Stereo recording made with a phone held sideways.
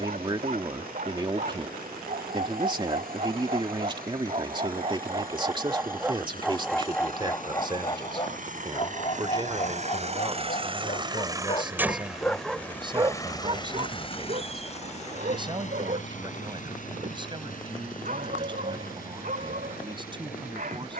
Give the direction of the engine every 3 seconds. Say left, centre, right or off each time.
right, right, right, right, left, left, left.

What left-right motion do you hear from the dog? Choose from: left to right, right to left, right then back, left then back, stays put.
left then back.